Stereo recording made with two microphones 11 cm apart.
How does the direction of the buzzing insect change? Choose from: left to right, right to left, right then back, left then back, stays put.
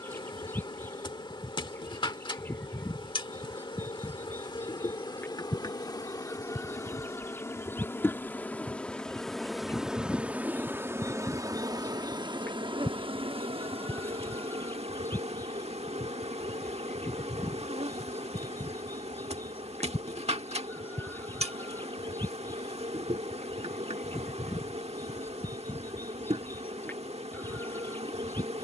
left to right.